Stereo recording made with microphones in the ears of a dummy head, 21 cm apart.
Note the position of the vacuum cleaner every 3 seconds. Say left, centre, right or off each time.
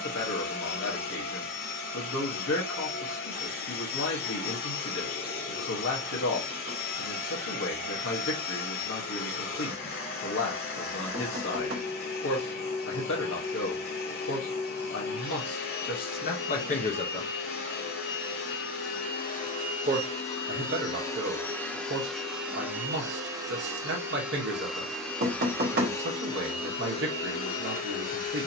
left, left, left, left, left, left, left, centre, centre, left.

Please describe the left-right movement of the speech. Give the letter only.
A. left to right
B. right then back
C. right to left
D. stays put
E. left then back
A.